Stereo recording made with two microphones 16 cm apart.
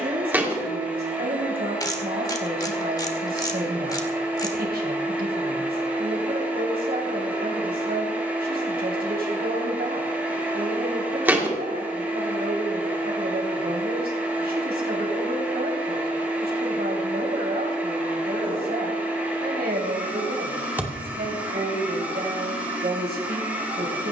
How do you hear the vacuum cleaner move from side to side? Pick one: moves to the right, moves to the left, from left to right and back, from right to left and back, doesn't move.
doesn't move.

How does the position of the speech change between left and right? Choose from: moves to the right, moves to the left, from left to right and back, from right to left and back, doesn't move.
doesn't move.